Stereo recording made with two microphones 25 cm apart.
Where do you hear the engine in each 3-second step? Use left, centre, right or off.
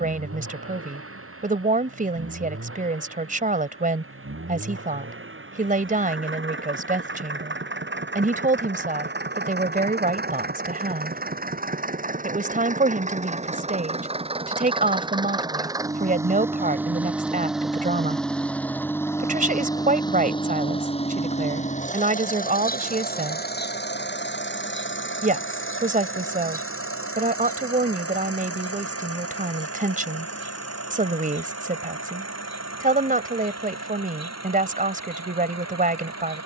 right, right, right, right, right, centre, centre, left, left, left, left, left.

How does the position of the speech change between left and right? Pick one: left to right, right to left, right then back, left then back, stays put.
stays put.